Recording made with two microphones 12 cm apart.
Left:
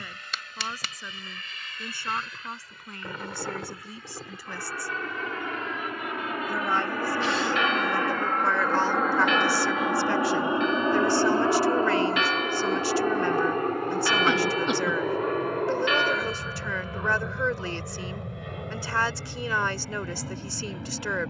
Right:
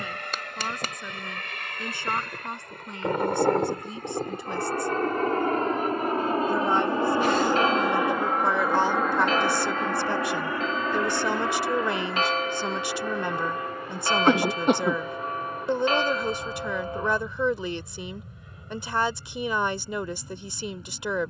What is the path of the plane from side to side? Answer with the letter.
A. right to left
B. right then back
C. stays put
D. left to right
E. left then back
A.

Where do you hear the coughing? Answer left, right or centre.
right.